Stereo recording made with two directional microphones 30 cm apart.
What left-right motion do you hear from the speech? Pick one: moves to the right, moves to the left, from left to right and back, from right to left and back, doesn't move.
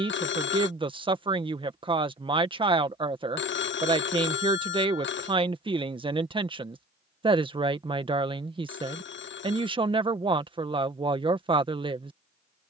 doesn't move.